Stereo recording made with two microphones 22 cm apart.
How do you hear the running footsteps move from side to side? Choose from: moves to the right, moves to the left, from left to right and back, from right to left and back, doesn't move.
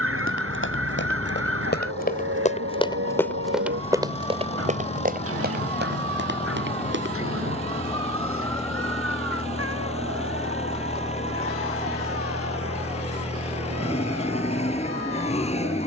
moves to the right.